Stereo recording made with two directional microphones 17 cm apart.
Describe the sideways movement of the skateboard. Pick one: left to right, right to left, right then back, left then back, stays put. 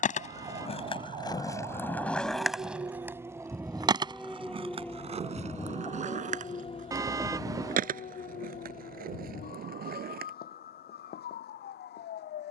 left to right.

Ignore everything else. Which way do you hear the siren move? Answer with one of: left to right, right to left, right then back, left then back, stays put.
right to left.